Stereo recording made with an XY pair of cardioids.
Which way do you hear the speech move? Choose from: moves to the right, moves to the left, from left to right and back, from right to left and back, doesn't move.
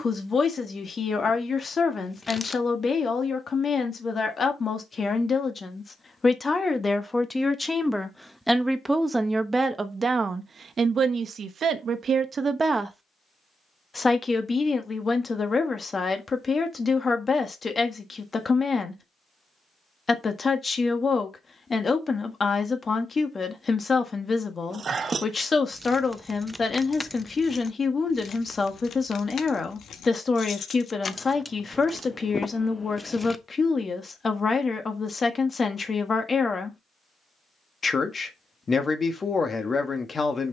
from left to right and back.